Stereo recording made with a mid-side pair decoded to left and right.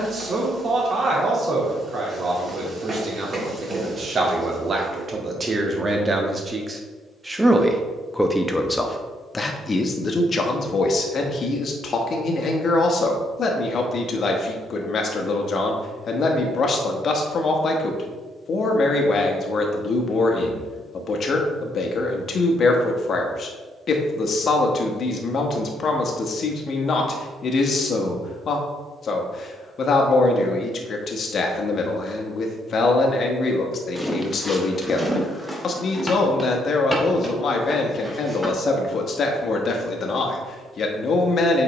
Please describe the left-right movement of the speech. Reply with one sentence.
You can hear the speech move to the left.